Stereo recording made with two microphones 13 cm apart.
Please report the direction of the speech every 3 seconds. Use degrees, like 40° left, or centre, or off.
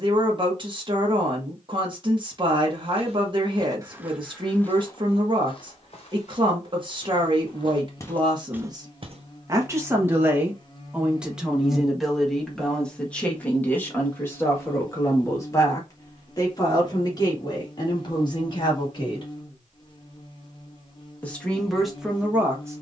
40° right, 40° right, 30° right, 10° right, 10° left, 30° left, 40° left, centre.